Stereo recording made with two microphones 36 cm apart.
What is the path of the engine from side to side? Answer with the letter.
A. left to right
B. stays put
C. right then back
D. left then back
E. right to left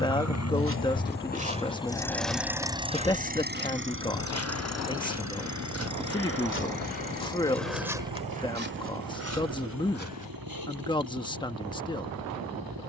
A.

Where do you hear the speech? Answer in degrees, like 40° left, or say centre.
10° left.